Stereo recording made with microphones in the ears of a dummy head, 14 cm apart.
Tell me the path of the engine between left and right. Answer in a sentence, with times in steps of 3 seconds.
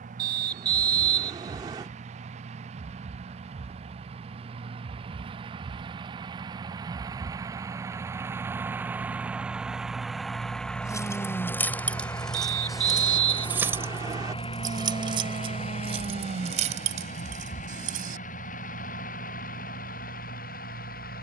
In this clip you hear the engine on the right from 0 s, in the centre from 9 s and on the left from 12 s.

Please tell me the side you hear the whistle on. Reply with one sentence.
In this clip you hear the whistle on the right.